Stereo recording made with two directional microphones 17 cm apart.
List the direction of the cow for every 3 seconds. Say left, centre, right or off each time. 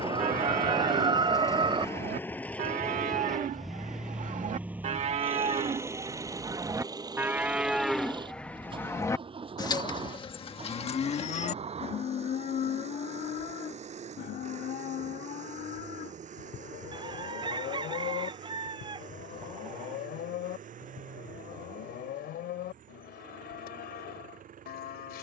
right, right, centre, left, left, left, left, left, left.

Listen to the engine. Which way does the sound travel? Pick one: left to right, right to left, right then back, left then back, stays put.
left to right.